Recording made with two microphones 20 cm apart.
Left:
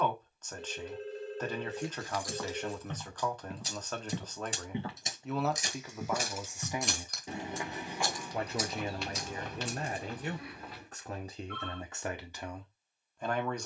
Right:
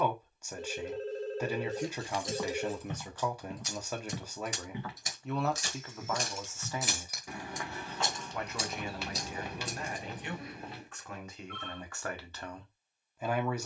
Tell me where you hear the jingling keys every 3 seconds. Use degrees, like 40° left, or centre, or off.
30° right, 20° left, 10° right, 40° right, off.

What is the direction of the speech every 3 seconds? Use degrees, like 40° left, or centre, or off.
10° right, centre, 20° left, 40° left, centre.